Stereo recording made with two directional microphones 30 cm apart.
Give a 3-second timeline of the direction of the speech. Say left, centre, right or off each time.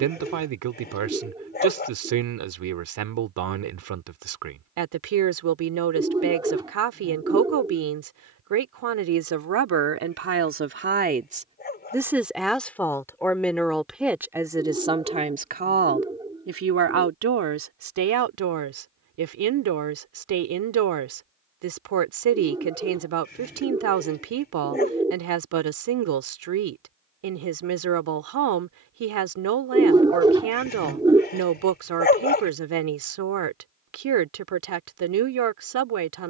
right, right, right, right, centre, right, right, right, right, right, right, right.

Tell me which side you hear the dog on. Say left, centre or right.
left.